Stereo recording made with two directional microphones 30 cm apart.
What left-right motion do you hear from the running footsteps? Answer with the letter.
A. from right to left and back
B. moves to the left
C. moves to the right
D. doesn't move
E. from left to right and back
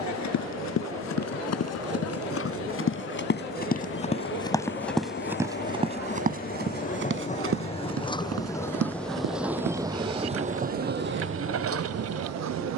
C.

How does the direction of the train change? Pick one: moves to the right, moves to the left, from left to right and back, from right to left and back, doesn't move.
moves to the right.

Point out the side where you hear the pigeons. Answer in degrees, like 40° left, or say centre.
60° right.